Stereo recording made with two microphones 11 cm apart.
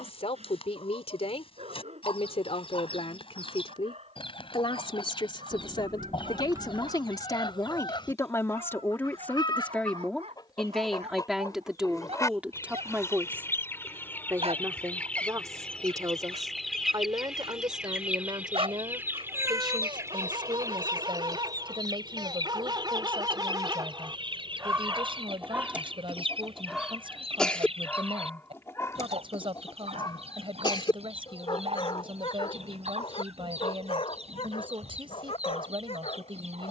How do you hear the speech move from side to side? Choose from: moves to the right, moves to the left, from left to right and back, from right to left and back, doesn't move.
moves to the right.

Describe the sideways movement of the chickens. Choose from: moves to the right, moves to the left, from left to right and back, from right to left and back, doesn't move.
moves to the right.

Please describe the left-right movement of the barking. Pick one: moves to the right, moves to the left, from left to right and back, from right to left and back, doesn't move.
moves to the left.